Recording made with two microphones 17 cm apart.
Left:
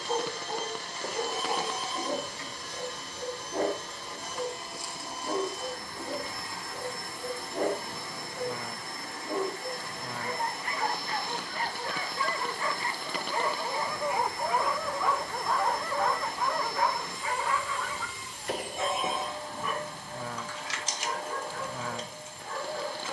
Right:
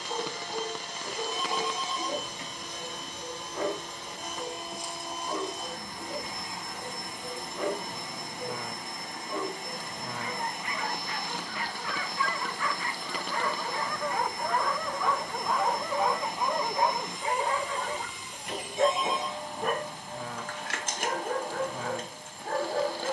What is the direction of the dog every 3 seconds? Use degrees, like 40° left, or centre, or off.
50° left, 50° left, 50° left, 40° left, 20° left, 20° right, 60° right, 60° right.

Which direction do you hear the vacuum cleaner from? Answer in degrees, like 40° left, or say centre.
20° right.